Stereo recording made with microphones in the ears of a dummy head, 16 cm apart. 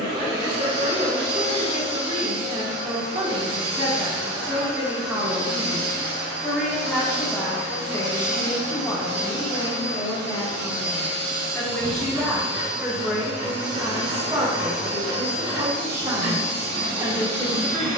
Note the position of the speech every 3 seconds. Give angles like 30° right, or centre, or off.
30° right, 10° right, 10° left, 20° left, 10° right, 20° right.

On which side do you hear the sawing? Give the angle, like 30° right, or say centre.
40° right.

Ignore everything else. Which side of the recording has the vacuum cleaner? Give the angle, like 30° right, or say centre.
70° right.